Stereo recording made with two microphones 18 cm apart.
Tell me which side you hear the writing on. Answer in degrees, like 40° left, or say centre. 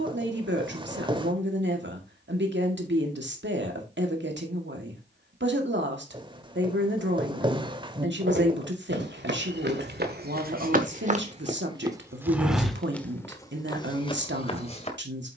30° right.